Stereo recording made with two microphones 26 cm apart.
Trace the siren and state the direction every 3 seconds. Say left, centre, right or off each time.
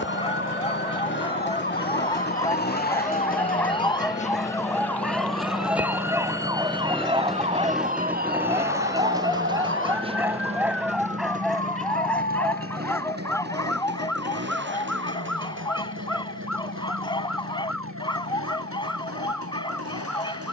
left, centre, right, right, right, right, right.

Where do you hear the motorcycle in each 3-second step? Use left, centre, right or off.
left, left, centre, right, right, right, right.